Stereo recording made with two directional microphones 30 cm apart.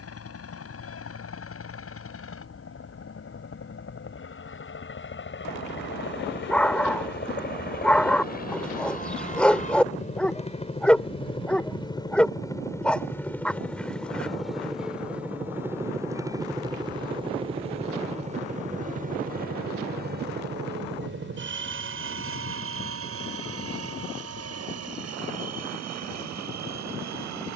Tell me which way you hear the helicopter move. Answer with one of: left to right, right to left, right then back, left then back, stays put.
left to right.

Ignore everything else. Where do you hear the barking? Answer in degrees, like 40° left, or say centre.
centre.